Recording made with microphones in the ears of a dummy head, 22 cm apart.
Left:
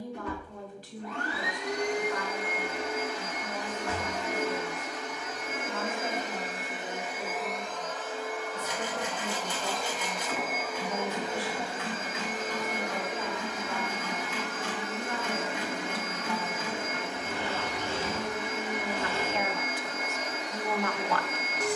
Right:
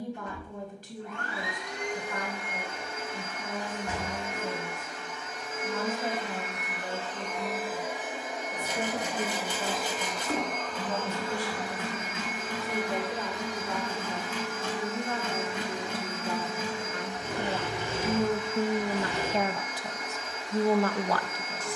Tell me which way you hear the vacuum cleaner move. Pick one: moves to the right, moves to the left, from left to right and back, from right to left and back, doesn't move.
from left to right and back.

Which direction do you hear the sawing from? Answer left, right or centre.
right.